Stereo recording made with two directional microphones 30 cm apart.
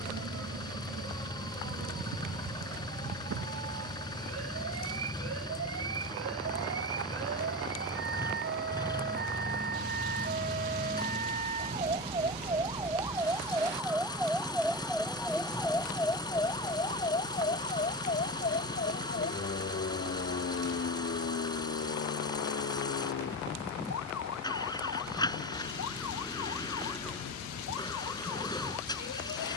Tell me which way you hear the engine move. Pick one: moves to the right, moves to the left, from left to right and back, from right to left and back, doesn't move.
doesn't move.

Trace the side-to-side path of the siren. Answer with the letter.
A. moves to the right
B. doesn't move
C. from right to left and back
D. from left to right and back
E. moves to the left
E.